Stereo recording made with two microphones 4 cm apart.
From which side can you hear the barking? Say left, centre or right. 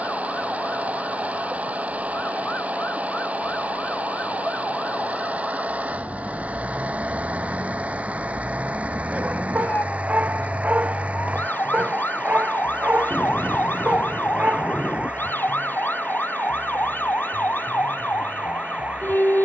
right.